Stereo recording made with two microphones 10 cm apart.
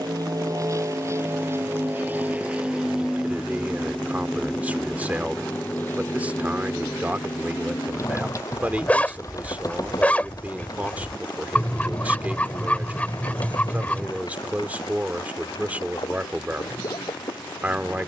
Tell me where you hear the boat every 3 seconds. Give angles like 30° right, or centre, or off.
30° right, 10° left, 30° left, 40° left, 50° left, 50° left.